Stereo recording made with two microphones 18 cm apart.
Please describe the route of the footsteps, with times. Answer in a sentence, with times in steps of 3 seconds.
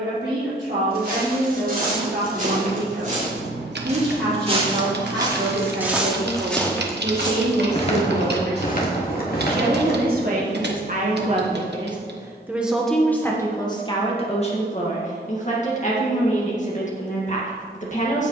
You can hear the footsteps on the right from 0 s, on the left from 6 s and not at all from 12 s.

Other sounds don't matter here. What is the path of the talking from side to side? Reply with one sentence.
You can hear the talking go from the right side to the left.